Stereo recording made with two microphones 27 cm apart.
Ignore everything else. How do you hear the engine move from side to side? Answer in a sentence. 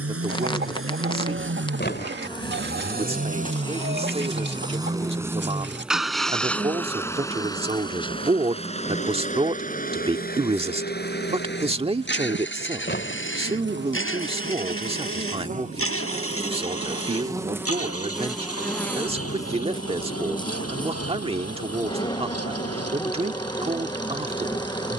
In this clip you hear the engine travel towards the left.